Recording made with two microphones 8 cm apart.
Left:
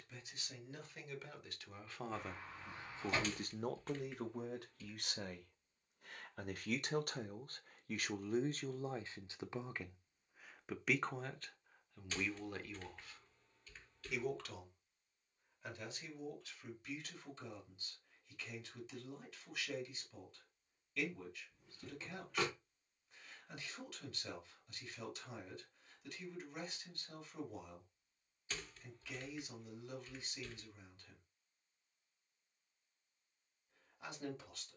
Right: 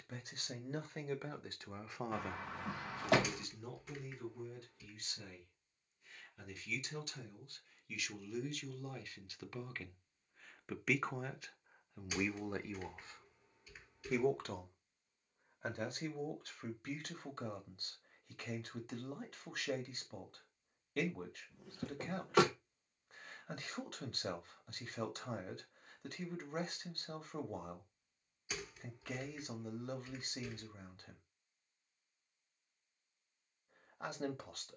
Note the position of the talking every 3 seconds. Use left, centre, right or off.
right, left, left, centre, right, right, right, right, right, right, right, right.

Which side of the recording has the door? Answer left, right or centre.
right.